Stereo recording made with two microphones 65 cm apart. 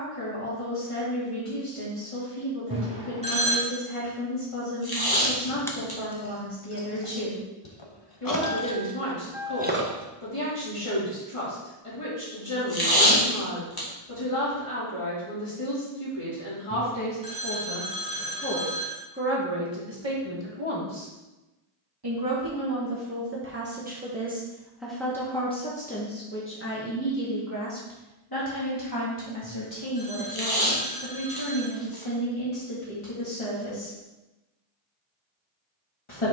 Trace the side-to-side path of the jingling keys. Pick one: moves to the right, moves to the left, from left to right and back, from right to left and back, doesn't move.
from right to left and back.